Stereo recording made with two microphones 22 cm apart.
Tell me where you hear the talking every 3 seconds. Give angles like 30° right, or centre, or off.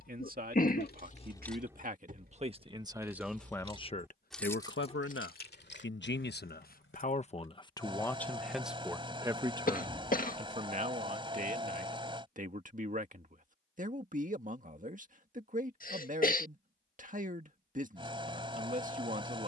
40° right, 40° left, 20° left, 30° right, 40° right, 40° right, 40° right.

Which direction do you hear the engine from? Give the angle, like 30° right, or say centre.
20° right.